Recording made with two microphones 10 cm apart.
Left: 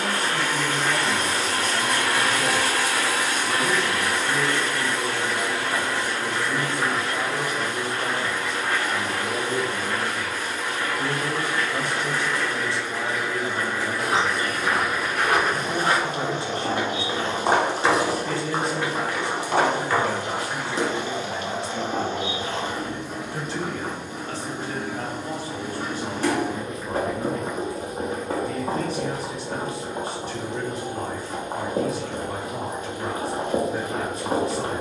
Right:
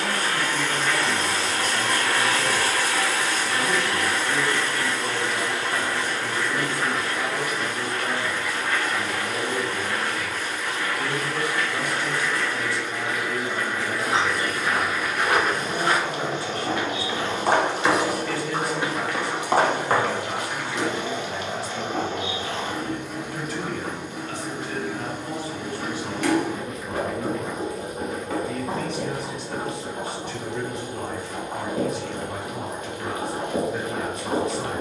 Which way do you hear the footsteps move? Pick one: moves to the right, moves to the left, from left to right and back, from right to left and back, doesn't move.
moves to the right.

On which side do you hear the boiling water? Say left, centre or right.
left.